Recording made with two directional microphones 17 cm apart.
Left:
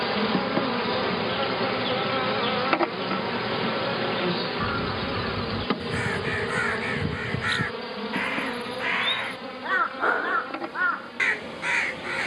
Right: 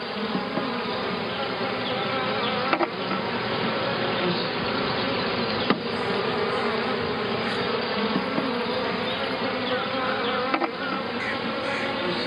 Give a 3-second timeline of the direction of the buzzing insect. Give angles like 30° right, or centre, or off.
20° left, 20° right, 50° right, 60° right.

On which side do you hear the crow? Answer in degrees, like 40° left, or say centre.
50° left.